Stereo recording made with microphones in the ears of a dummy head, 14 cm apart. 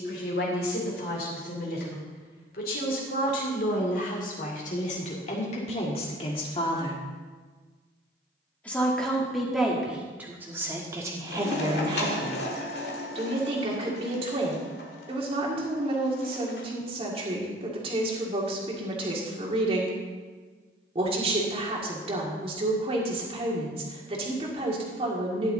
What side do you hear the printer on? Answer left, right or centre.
left.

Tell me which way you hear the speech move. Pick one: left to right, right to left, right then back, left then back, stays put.
left to right.